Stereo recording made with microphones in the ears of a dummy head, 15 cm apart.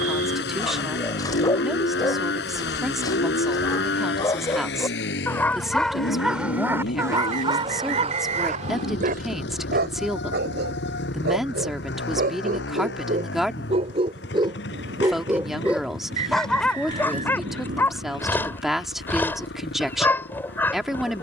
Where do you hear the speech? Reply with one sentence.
You can hear the speech in the centre.